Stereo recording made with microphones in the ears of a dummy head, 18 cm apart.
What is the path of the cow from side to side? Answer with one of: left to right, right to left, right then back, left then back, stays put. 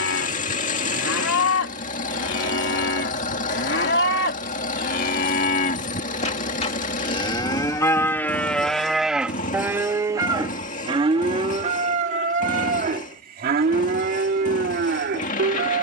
left to right.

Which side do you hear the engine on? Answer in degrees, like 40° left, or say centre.
40° left.